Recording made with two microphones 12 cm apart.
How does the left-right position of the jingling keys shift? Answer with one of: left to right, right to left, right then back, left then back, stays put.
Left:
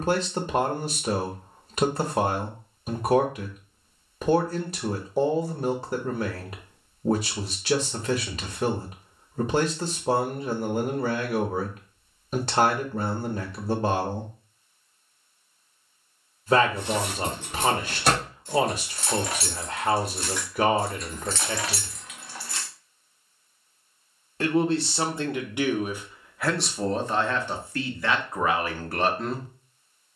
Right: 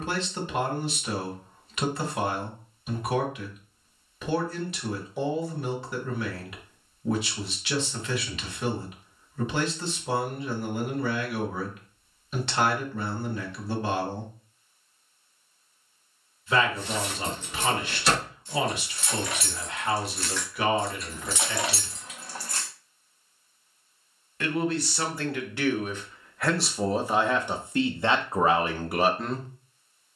left to right.